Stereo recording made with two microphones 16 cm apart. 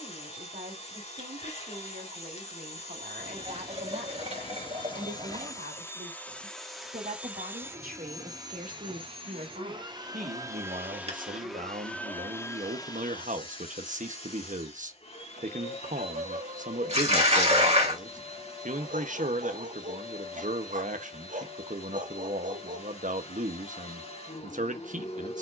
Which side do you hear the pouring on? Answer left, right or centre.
right.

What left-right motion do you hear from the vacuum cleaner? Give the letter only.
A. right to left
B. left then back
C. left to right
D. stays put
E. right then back
E.